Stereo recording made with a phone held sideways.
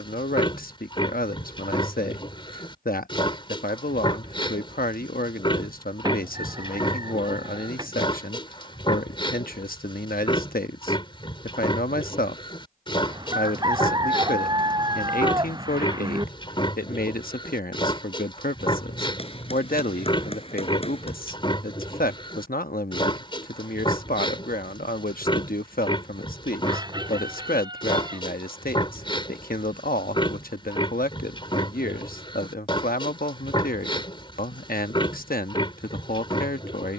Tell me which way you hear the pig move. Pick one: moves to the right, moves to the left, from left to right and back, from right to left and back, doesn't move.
doesn't move.